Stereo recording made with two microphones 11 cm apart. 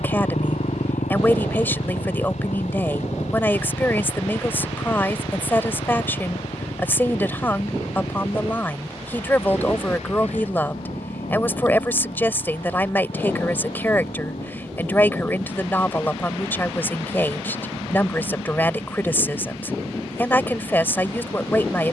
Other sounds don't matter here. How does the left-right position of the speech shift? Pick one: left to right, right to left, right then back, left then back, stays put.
stays put.